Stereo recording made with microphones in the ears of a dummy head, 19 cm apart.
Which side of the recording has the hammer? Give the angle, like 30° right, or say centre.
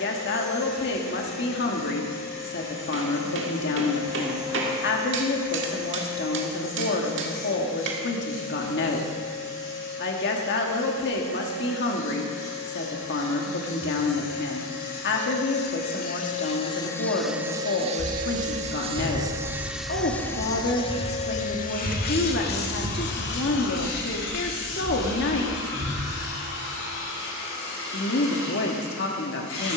60° right.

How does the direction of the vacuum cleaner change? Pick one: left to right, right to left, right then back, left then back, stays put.
right then back.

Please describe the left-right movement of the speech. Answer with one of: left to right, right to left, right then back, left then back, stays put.
stays put.